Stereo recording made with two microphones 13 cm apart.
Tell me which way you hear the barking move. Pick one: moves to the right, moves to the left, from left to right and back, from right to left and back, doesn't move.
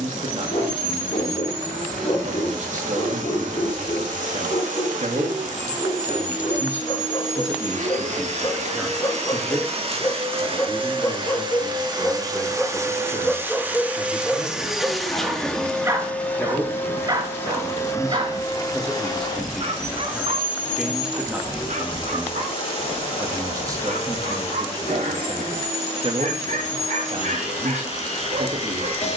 moves to the right.